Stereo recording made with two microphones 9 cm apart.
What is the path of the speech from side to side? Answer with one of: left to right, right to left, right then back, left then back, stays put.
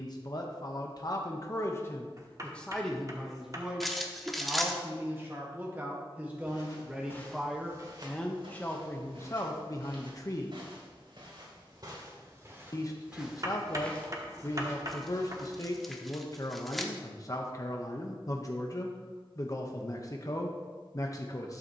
right then back.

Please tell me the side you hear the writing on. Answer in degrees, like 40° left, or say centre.
40° right.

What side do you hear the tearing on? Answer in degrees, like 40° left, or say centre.
centre.